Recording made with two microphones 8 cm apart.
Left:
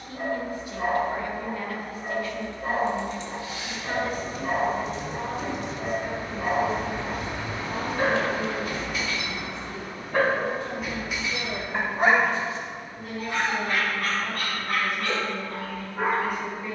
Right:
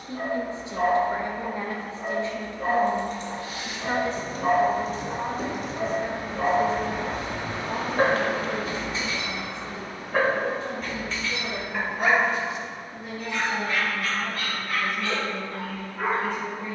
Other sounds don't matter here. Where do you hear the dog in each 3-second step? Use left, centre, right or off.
right, right, right, centre, left, left.